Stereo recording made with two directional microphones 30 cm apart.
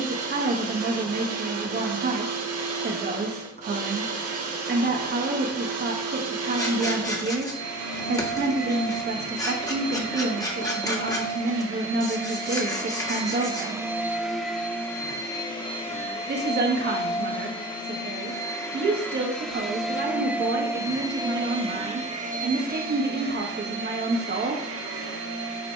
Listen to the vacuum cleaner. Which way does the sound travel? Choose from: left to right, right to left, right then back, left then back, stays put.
left then back.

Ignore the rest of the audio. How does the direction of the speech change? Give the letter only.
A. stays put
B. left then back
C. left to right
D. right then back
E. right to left
A.